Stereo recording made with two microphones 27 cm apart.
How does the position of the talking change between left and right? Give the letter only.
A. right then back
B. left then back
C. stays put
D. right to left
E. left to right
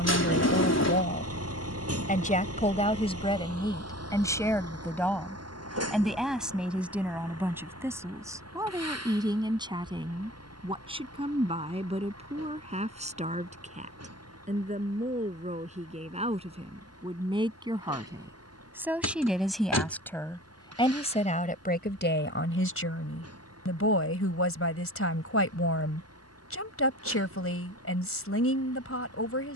A.